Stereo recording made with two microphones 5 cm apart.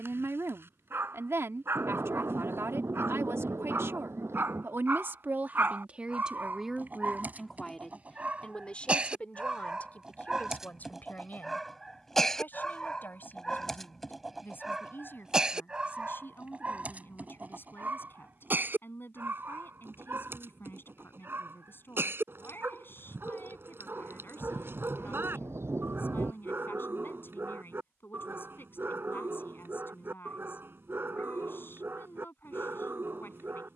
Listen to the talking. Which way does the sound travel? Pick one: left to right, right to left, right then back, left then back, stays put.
right to left.